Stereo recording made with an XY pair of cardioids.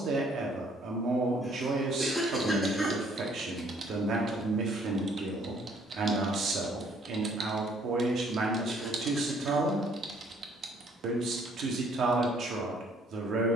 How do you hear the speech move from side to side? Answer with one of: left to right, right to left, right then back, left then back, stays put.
stays put.